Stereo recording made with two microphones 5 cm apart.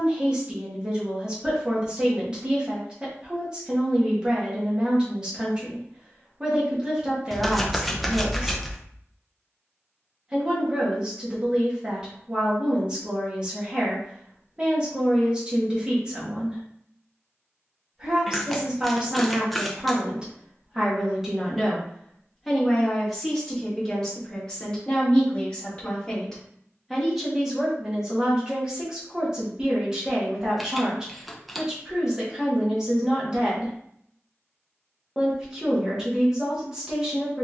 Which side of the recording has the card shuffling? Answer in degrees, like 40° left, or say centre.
centre.